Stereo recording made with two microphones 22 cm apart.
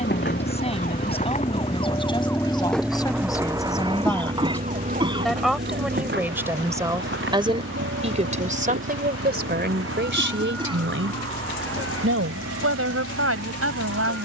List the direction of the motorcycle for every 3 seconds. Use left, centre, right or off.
left, right, right, right, right.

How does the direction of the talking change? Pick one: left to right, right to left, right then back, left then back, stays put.
left to right.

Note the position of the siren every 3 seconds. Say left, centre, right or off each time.
left, right, right, right, right.